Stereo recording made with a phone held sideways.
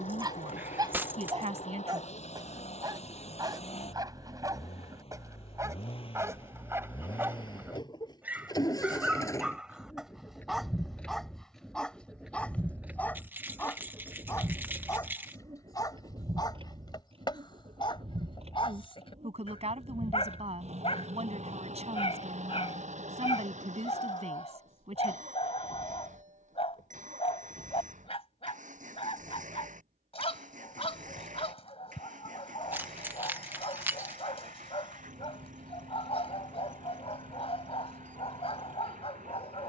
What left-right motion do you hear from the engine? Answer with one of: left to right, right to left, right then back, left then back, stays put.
left to right.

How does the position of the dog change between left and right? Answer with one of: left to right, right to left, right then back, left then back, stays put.
right to left.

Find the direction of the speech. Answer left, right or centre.
right.